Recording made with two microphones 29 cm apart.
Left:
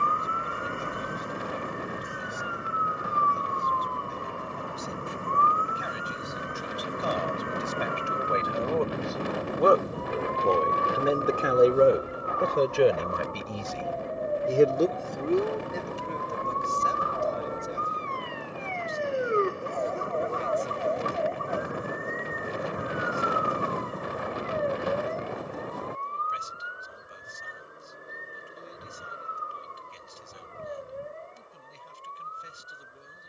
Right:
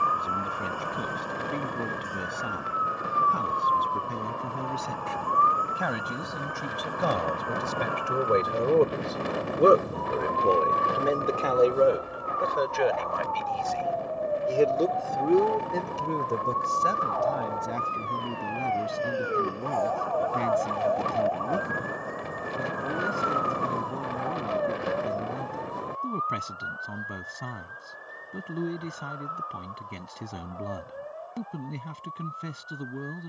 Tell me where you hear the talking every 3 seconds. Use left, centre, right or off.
right, right, right, centre, left, right, right, right, right, right, right.